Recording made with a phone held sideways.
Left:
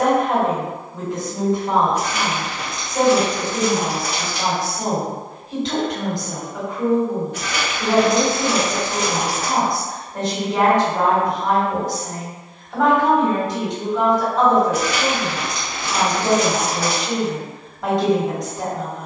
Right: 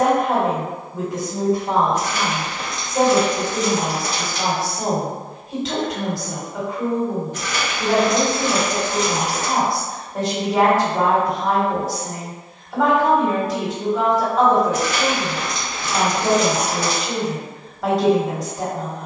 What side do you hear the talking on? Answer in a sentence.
In this clip you hear the talking in the centre.